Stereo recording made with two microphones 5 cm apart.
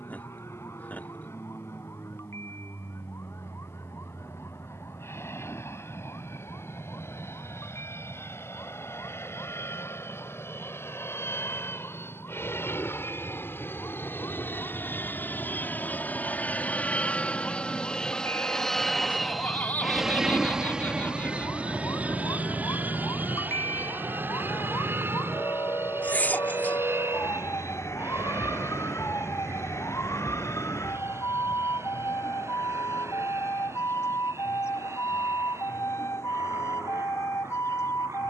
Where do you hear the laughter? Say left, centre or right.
left.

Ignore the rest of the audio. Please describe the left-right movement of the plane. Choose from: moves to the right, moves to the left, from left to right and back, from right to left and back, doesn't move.
moves to the right.